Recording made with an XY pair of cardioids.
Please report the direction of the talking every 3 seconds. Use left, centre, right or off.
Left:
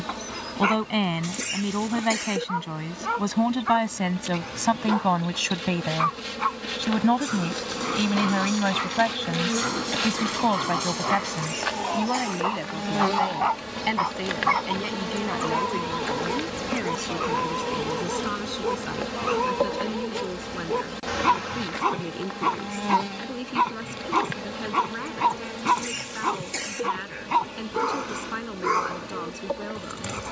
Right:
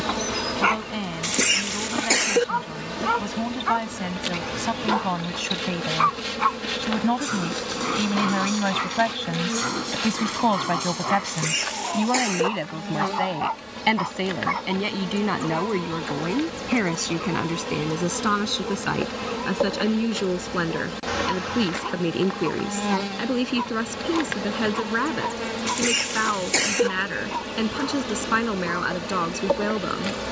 left, left, centre, centre, right, right, right, right, right, right.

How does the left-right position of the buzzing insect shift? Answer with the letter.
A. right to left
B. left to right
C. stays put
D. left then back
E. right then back
D.